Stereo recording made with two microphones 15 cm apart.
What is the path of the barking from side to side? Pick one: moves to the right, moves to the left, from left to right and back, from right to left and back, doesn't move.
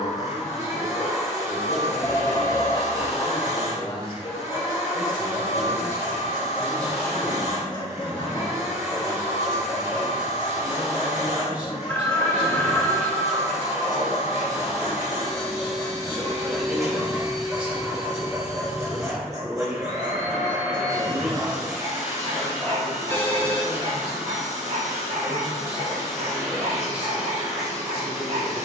moves to the right.